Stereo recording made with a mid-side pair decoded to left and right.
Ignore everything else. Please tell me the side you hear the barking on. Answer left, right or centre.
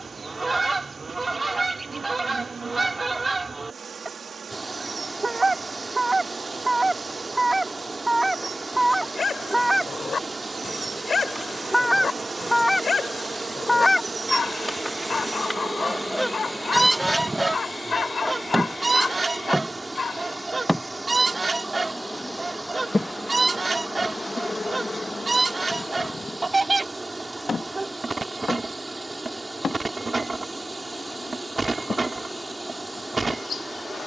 left.